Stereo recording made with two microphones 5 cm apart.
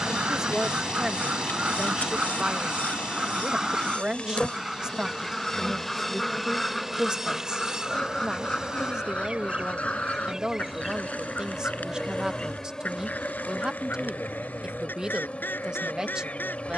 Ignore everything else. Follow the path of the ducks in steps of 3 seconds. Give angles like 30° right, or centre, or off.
30° right, 10° right, 10° left, 30° left, 40° left, 40° left.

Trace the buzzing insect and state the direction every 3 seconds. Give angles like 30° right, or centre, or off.
40° left, 20° left, 10° right, 10° right, 20° left, 30° left.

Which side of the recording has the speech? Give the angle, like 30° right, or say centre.
20° right.